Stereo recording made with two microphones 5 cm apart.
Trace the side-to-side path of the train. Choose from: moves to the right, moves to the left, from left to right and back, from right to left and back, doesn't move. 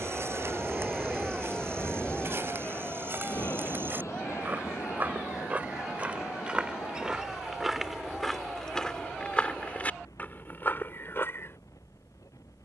moves to the left.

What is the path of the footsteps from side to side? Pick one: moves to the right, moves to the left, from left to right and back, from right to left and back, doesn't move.
moves to the left.